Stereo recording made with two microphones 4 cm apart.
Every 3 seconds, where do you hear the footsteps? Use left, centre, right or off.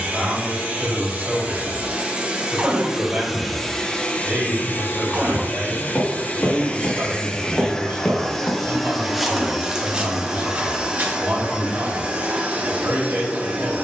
off, left, left, right, off.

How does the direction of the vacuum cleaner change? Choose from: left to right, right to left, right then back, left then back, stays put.
left then back.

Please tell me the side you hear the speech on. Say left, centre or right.
right.